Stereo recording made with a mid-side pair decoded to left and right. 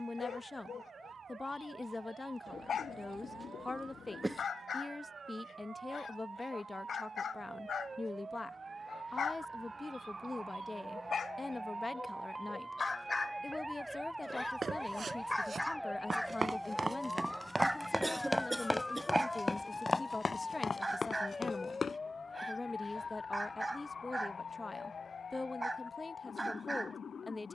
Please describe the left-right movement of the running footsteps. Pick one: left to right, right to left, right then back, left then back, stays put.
right to left.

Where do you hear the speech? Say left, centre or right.
left.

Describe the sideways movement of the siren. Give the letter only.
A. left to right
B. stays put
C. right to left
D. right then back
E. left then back
C.